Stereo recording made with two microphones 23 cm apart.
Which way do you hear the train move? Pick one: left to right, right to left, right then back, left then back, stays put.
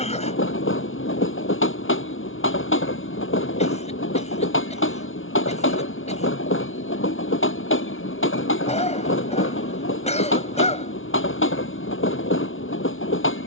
stays put.